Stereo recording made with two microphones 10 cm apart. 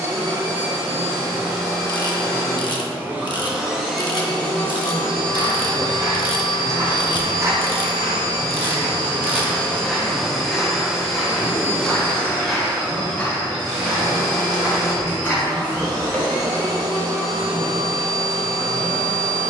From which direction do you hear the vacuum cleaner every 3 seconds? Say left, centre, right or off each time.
right, centre, left, centre, right, right, right.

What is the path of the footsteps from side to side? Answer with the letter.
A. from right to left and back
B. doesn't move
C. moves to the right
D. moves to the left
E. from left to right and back
D.